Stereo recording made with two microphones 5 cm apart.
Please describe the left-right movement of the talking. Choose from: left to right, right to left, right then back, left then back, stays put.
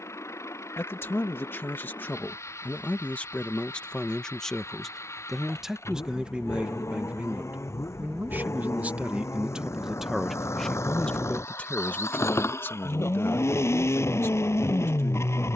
right then back.